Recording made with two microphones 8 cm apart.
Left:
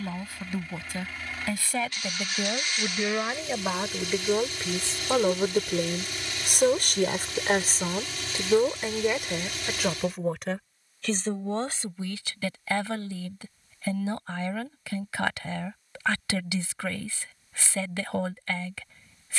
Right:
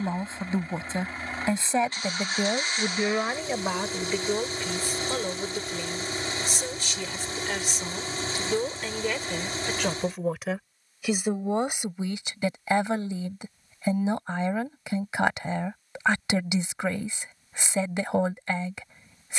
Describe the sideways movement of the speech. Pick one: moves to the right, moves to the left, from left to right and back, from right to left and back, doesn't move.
from right to left and back.